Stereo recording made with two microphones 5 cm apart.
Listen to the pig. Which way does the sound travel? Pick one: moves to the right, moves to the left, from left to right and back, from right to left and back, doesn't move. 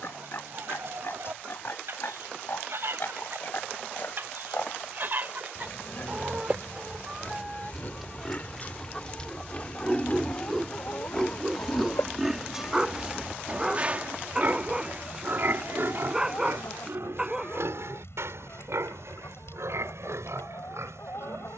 moves to the right.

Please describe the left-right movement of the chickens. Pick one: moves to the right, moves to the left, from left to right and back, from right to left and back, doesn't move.
moves to the left.